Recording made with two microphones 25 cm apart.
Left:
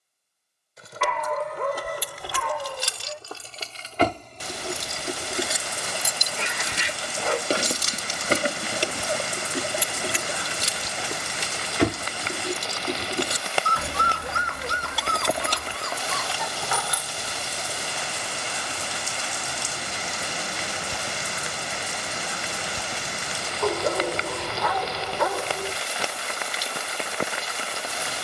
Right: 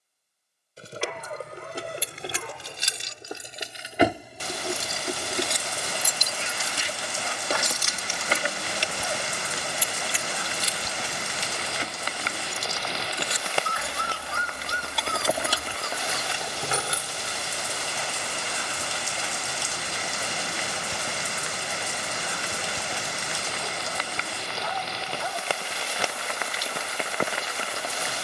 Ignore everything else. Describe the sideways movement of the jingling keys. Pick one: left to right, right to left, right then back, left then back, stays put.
left then back.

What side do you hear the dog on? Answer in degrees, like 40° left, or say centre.
80° left.